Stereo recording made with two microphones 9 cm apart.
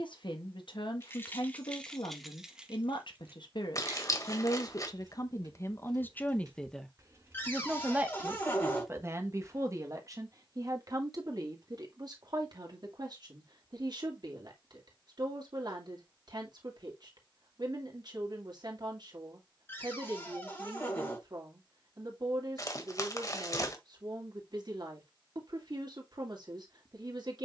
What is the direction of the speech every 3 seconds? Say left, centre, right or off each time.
left, left, centre, right, right, right, right, right, right.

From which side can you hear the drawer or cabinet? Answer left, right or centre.
left.